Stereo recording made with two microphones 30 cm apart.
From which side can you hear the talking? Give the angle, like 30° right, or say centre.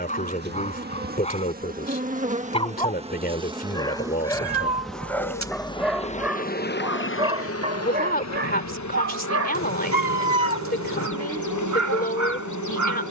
30° left.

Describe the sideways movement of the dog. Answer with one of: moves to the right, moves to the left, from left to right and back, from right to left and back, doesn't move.
moves to the right.